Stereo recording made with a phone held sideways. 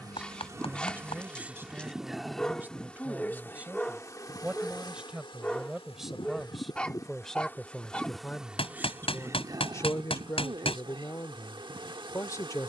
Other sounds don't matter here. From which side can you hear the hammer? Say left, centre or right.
left.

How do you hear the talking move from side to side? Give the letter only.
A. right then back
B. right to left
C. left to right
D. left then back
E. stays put
B.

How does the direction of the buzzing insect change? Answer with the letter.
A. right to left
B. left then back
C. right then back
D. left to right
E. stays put
B.